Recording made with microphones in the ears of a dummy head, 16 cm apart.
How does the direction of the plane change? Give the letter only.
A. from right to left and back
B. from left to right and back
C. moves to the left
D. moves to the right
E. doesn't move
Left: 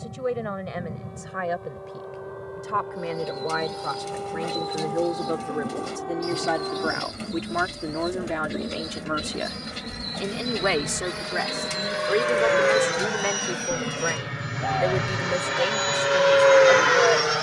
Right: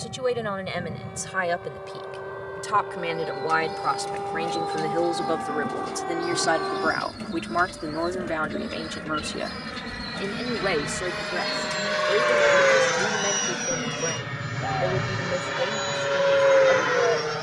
C.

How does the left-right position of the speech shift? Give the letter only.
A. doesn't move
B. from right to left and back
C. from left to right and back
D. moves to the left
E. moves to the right
D.